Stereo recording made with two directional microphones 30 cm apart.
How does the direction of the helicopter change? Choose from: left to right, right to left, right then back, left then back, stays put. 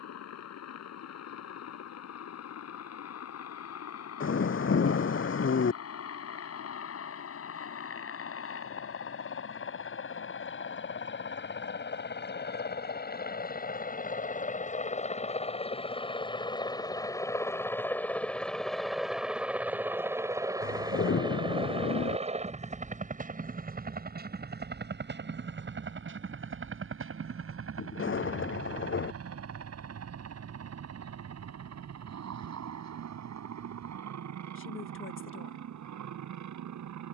left to right.